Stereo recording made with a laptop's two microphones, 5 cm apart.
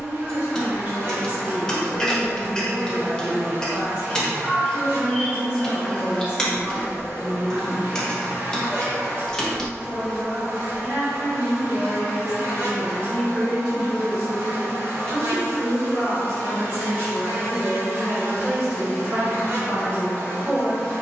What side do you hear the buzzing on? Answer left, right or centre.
right.